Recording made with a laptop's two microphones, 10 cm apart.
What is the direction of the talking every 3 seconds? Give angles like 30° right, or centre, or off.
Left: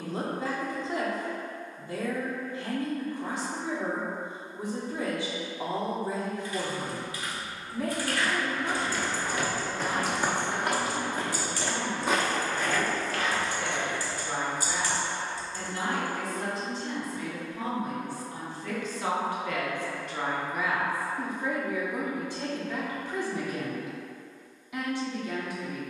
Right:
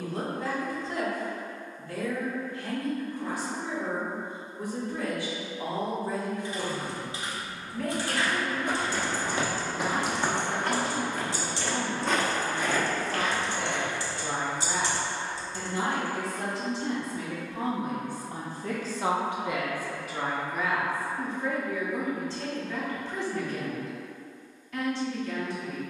20° left, 20° left, 20° left, 20° right, 70° right, 70° right, 20° right, 10° left, 10° left.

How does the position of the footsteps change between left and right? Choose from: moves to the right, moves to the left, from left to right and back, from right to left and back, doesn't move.
from right to left and back.